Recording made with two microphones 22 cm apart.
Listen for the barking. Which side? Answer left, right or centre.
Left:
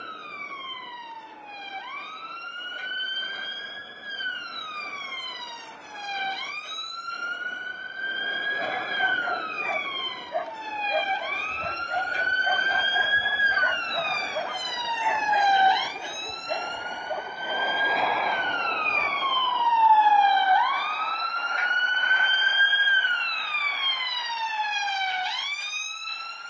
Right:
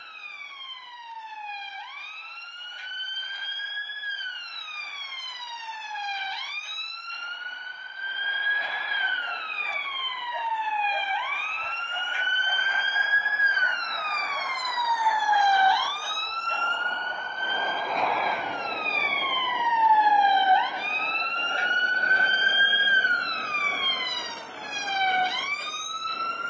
left.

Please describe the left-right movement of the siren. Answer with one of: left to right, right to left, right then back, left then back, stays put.
left to right.